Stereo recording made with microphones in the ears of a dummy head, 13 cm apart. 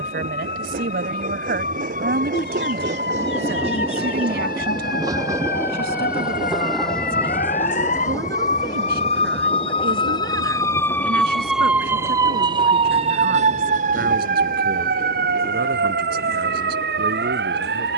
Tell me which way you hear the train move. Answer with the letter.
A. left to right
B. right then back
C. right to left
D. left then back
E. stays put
C.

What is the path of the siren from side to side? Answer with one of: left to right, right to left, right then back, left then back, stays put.
left to right.